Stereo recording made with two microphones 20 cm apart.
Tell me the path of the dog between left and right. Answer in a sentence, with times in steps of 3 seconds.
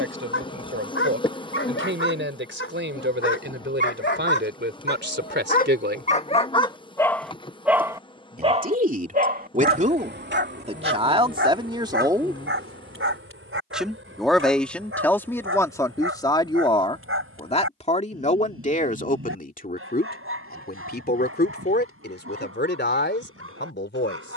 In this clip you hear the dog on the left from 0 s, in the centre from 6 s and on the right from 9 s.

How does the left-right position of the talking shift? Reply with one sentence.
You can hear the talking move to the left.